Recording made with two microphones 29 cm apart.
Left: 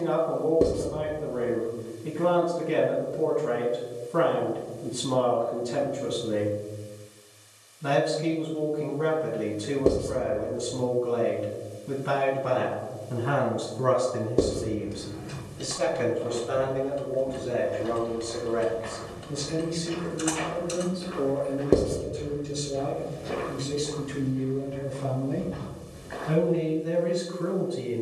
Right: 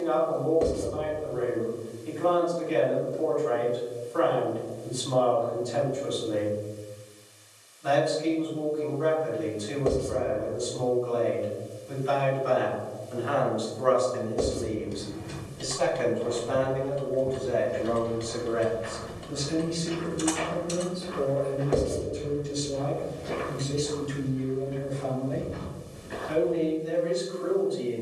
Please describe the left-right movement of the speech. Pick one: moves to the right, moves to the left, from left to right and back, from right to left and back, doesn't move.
from left to right and back.